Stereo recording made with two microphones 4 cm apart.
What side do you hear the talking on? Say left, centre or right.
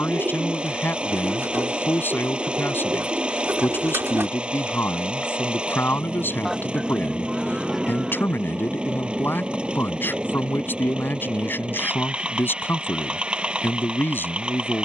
left.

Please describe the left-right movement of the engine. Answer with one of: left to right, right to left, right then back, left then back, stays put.
stays put.